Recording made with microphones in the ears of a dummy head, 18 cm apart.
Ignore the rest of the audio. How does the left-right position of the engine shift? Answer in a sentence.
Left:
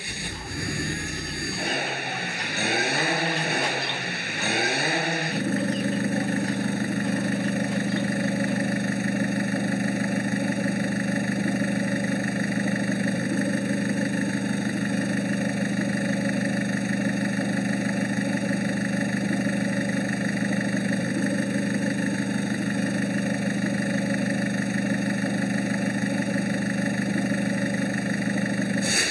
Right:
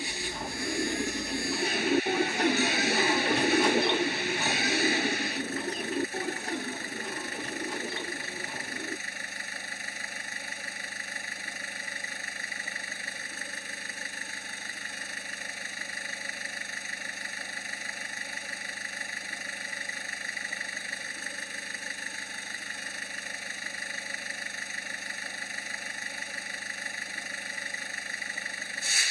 You can hear the engine stay in one place.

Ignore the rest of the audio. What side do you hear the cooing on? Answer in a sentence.
In this clip you hear the cooing on the right.